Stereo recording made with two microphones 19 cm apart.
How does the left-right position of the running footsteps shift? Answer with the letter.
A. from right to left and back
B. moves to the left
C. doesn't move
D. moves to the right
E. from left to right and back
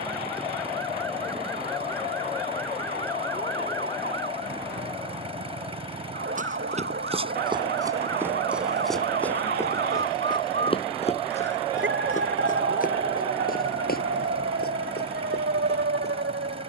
B.